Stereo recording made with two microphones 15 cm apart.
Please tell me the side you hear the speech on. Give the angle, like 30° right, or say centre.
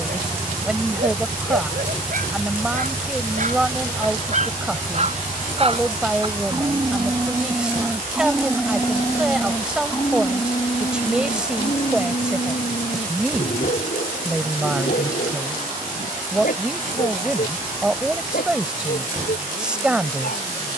10° right.